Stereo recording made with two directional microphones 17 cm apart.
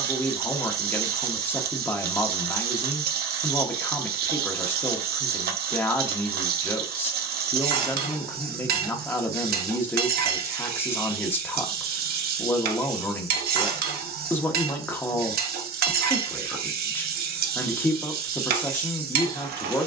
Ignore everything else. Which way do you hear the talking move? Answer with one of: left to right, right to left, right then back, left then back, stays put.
stays put.